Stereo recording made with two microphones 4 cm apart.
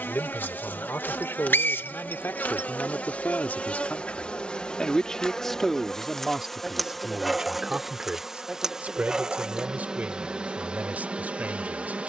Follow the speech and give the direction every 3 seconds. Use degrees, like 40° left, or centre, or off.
70° left, 30° left, 20° right, 40° right.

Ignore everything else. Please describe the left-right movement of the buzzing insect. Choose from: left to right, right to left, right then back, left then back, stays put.
left to right.